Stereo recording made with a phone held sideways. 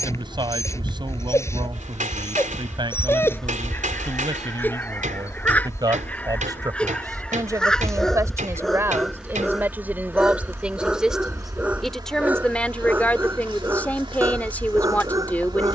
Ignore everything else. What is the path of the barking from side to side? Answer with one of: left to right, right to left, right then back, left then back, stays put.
left to right.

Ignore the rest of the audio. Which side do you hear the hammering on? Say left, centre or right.
right.